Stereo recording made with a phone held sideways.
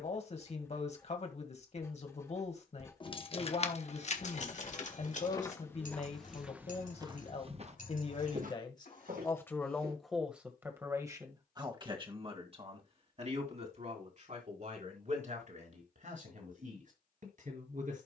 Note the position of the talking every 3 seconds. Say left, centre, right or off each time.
left, left, left, centre, right, right.